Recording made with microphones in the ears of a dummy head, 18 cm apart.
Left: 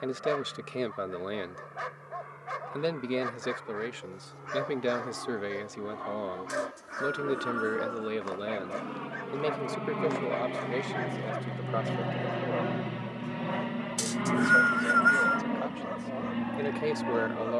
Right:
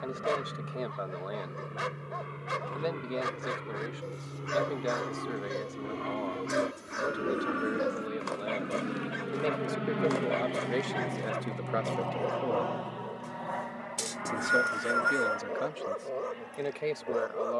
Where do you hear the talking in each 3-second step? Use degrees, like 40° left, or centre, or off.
30° left, 30° left, 30° left, 10° right, 30° right, centre.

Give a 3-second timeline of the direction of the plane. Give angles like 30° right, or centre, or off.
50° right, 50° right, 30° right, 10° right, 40° left, 60° left.